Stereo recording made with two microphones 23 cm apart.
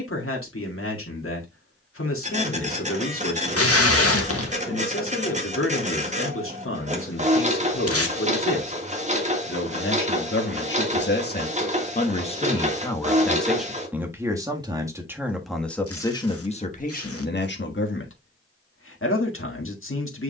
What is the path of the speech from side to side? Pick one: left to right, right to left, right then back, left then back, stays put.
right then back.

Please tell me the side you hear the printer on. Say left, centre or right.
right.